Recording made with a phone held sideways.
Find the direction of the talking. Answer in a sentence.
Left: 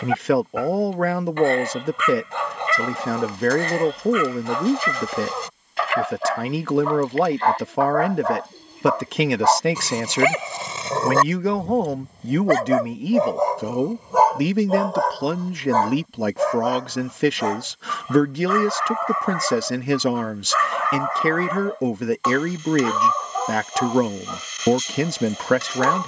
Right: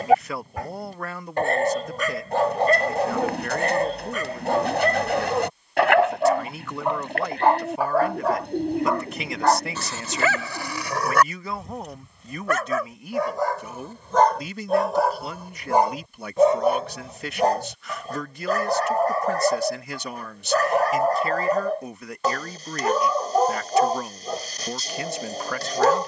In this clip you hear the talking on the left.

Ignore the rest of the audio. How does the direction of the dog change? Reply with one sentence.
You can hear the dog move from right to left and back again.